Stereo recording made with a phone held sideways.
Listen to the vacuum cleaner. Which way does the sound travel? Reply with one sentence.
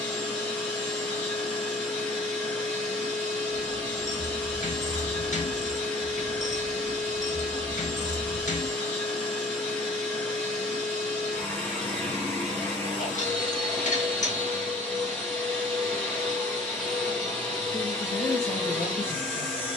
You can hear the vacuum cleaner stay put.